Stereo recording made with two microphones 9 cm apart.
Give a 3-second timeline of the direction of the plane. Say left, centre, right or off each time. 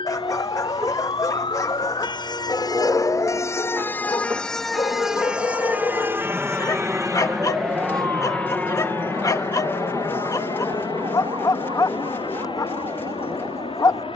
right, right, centre, left, left.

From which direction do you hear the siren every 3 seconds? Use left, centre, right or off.
left, centre, right, right, right.